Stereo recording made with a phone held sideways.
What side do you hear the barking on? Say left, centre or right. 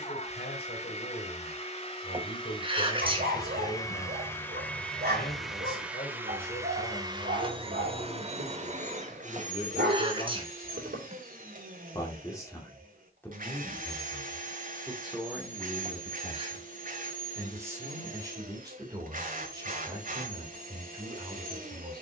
right.